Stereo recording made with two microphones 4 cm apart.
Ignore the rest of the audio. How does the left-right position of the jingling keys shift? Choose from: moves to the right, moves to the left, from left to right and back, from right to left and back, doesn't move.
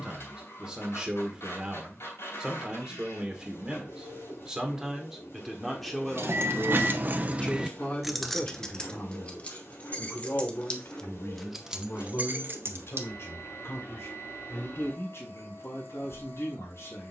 from right to left and back.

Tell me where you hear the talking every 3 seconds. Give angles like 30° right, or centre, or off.
20° right, 10° right, 20° left, 50° left, 70° left, 80° left.